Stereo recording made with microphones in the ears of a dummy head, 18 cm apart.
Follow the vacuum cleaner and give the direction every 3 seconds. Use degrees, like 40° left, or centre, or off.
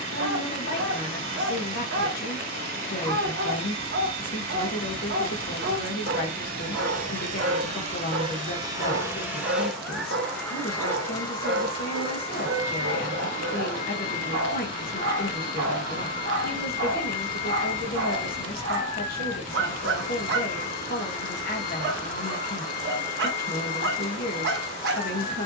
50° right, 50° right, 30° right, 10° left, 30° left, 40° left, 40° left, 40° left, 40° left.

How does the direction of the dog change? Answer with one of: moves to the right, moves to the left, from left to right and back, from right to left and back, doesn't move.
doesn't move.